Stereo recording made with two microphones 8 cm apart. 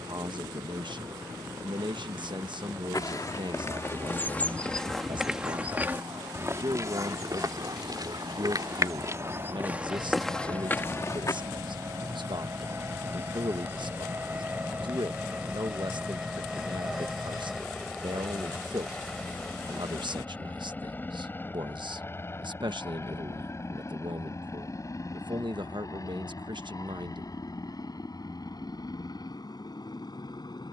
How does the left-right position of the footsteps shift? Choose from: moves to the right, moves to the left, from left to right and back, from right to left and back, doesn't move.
from left to right and back.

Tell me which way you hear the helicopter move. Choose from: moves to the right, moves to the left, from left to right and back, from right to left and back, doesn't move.
moves to the left.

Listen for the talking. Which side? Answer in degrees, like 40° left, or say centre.
70° right.